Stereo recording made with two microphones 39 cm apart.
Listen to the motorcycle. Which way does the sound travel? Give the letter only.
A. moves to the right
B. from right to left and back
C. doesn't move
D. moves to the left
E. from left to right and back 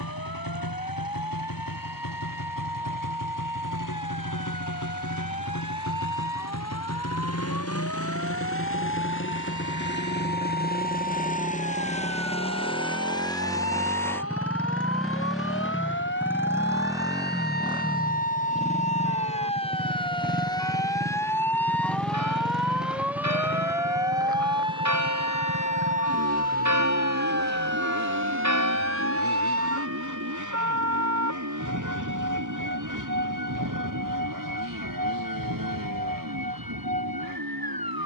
A.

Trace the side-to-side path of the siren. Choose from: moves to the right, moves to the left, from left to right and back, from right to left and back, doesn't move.
moves to the right.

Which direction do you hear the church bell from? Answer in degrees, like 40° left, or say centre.
40° right.